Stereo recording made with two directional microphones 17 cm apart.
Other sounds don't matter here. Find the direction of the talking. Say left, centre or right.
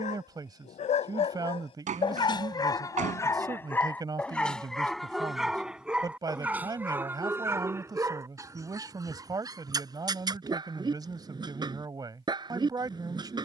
right.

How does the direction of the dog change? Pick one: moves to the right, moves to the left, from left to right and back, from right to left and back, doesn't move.
moves to the right.